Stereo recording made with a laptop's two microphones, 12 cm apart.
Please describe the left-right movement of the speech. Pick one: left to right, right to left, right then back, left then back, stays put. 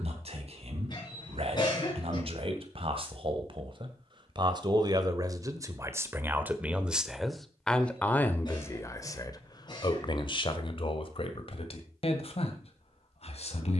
right to left.